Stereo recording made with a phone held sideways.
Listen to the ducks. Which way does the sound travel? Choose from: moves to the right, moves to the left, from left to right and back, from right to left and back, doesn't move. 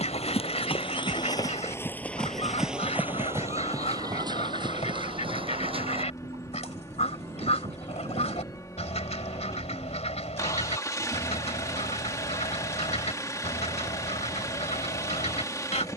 doesn't move.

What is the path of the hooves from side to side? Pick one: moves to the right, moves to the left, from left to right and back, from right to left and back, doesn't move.
moves to the right.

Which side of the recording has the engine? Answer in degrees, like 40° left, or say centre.
30° left.